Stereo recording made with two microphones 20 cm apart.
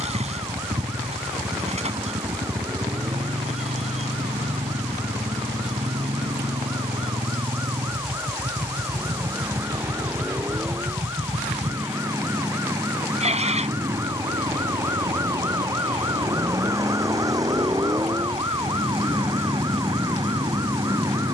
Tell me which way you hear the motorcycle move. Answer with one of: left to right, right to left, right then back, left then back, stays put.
stays put.